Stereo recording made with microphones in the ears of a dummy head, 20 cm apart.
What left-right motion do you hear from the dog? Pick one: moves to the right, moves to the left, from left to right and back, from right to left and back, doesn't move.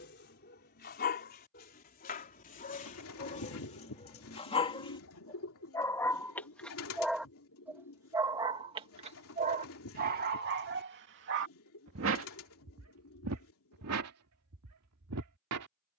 moves to the right.